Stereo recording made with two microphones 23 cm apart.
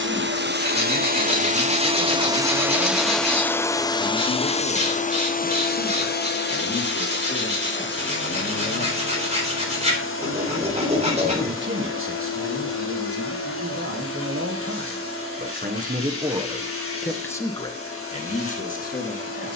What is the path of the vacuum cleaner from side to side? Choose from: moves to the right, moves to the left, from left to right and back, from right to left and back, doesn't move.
moves to the left.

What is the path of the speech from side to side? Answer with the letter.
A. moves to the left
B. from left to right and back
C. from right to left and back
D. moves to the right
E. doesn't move
B.